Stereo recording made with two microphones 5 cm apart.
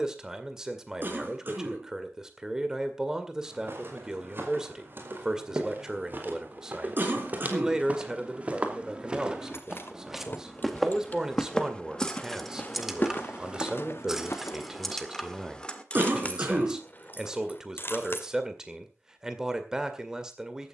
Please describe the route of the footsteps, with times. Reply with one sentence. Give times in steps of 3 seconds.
You can hear the footsteps not at all from 0 s, on the right from 3 s, in the centre from 9 s, on the left from 12 s and not at all from 15 s.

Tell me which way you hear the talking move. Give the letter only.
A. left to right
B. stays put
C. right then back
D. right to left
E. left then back
B.